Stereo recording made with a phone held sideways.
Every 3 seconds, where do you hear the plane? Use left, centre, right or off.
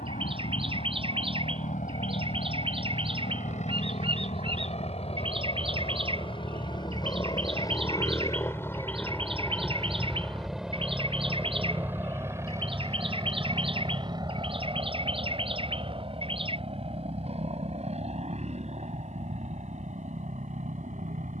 left, left, left, centre, right, right, right.